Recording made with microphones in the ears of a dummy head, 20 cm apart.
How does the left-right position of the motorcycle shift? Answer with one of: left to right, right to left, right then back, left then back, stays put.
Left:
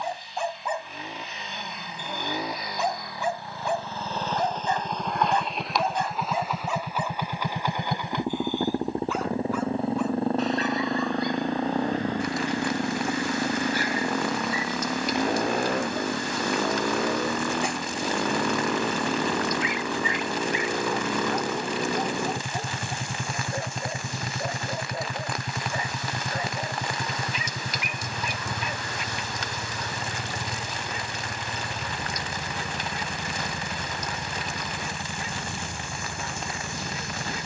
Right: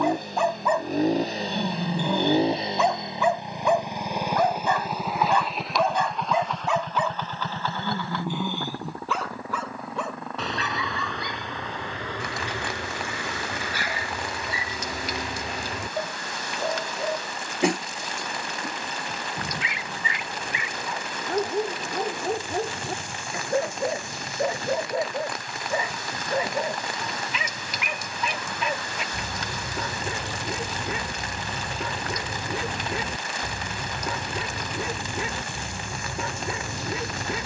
right to left.